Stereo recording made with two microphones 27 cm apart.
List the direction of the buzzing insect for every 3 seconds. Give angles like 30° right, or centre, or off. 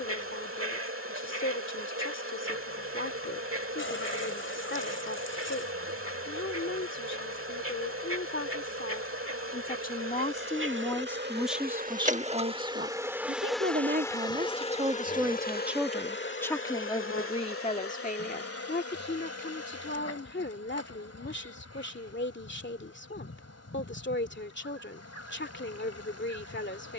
50° right, 50° right, 50° right, 50° right, centre, 40° left, 60° left, 60° left, 60° left.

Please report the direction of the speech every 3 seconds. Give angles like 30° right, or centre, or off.
50° left, 50° left, 50° left, 20° left, 30° right, 10° left, 40° left, 40° left, 40° left.